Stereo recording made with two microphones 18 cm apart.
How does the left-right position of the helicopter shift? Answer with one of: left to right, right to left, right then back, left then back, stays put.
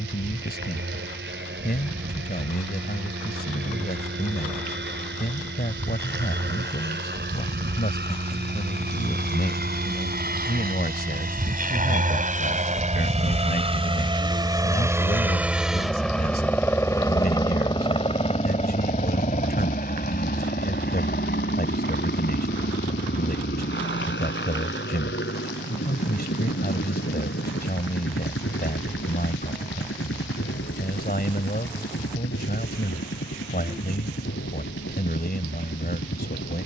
right to left.